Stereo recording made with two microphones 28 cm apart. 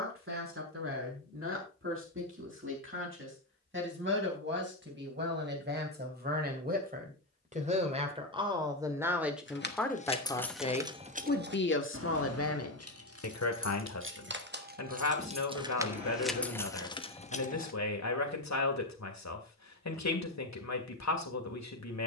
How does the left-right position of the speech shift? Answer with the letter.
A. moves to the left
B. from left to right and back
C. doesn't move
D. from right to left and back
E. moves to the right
A.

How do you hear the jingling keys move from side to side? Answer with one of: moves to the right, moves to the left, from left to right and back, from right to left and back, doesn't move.
from left to right and back.